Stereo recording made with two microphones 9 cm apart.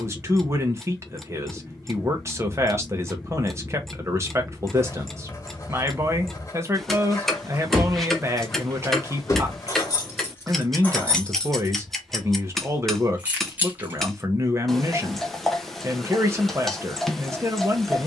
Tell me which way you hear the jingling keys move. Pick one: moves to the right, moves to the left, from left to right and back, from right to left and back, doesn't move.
from right to left and back.